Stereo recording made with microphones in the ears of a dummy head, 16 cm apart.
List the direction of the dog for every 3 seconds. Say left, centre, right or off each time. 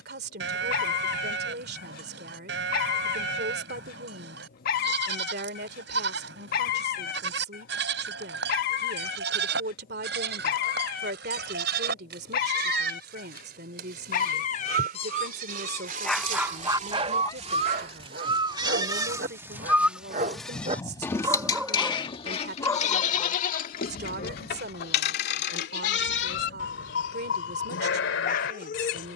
left, left, left, left, left, centre, right, centre, left, left.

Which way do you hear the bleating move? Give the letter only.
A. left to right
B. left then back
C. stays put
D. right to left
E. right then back
D.